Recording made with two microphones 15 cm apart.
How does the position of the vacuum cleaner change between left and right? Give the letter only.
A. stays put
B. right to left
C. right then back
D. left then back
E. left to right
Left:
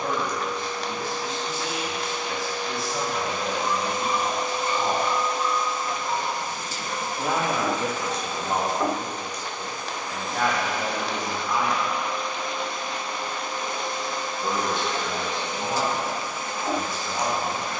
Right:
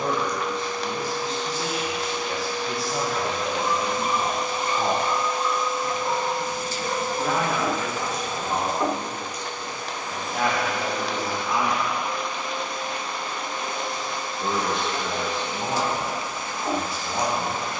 A.